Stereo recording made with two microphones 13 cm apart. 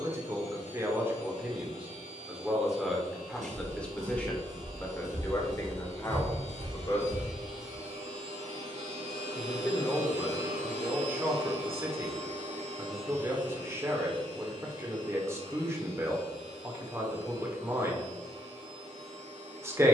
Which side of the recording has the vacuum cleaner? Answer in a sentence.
You can hear the vacuum cleaner on the right.